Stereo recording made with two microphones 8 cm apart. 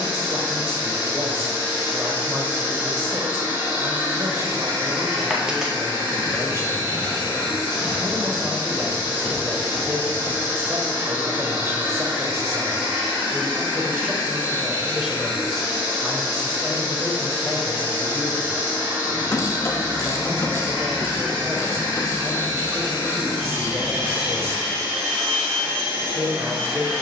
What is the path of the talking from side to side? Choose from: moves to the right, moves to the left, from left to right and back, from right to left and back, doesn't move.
from right to left and back.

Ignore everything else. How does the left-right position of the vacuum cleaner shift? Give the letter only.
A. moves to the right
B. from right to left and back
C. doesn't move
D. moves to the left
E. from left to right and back
C.